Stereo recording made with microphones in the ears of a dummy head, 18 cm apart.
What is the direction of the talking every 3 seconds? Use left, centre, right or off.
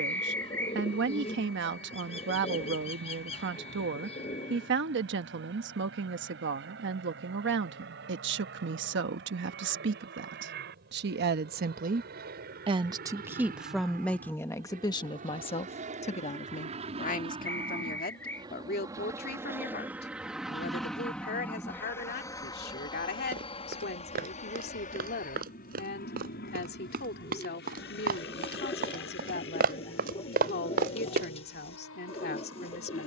right, right, right, right, centre, left, left, left, left, left, left.